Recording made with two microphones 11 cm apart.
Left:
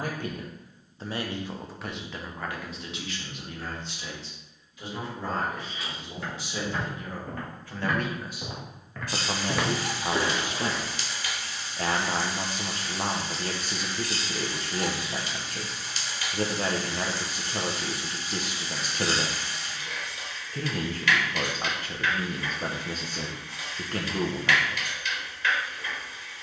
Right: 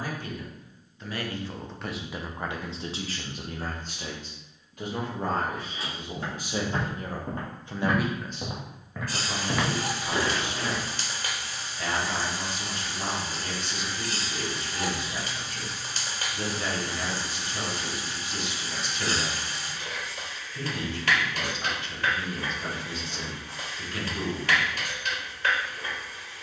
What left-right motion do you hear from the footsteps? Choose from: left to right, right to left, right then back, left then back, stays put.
right to left.